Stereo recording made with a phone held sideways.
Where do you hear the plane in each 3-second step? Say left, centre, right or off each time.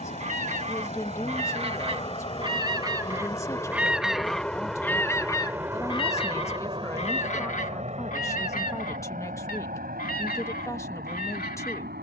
left, centre, right, right.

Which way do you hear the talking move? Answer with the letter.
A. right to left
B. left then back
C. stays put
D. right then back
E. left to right
C.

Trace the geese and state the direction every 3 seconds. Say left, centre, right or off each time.
right, centre, left, left.